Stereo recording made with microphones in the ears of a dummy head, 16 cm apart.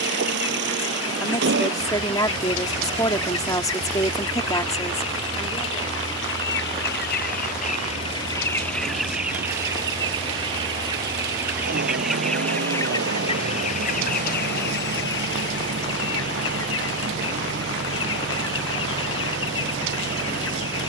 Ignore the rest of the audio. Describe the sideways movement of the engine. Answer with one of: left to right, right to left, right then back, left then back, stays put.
stays put.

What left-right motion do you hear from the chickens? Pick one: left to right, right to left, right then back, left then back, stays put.
right then back.